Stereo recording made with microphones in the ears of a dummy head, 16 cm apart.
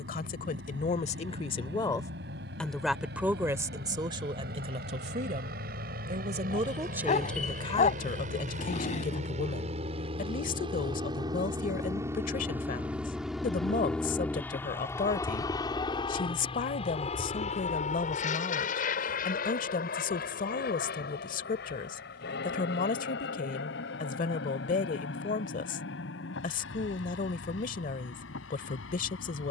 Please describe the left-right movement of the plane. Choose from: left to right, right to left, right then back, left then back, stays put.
right to left.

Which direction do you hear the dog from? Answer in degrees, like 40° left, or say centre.
40° left.